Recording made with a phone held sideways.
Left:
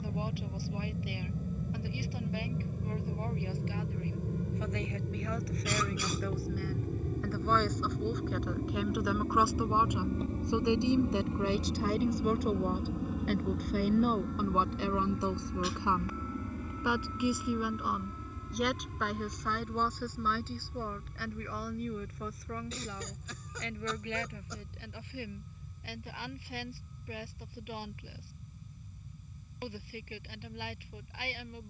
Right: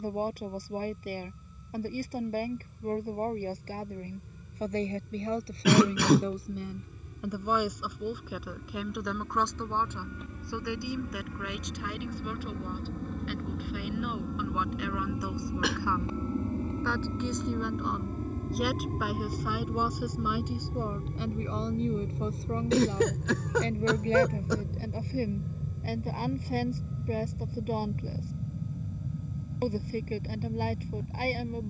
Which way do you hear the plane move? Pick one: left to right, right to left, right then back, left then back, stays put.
left to right.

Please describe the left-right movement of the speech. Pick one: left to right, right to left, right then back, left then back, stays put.
left then back.